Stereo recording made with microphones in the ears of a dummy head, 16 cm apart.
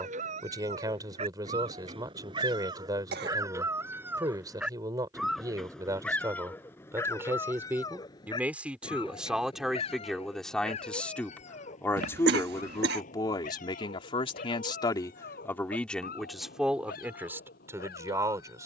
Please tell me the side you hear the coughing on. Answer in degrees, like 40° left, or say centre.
70° right.